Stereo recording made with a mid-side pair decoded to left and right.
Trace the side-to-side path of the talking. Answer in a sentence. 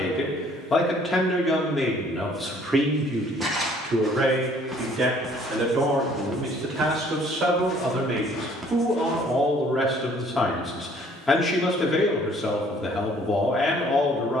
You can hear the talking go right and come back.